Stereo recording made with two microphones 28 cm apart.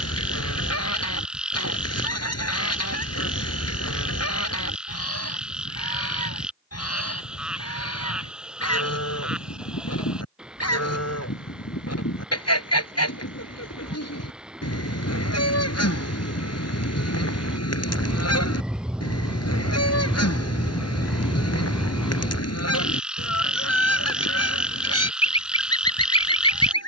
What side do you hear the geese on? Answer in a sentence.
In this clip you hear the geese on the left.